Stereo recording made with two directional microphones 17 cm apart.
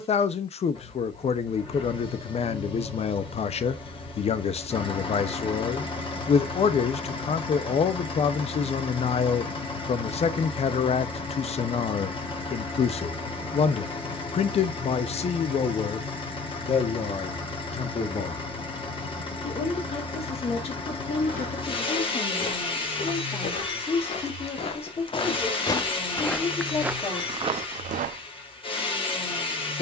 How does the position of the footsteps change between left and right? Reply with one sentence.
You can hear the footsteps travel towards the right.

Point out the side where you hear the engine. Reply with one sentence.
In this clip you hear the engine on the left.